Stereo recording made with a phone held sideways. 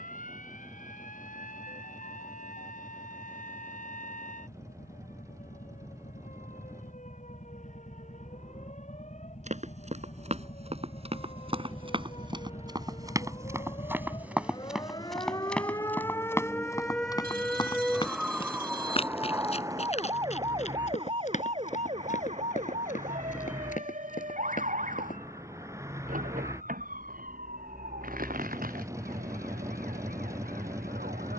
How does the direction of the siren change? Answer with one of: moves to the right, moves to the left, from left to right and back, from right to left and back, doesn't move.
moves to the right.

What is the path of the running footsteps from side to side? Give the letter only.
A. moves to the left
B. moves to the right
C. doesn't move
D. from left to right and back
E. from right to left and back
A.